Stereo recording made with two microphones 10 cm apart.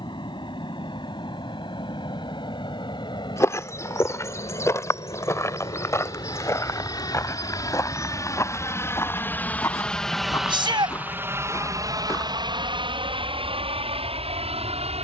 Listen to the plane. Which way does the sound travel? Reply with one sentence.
You can hear the plane move to the right.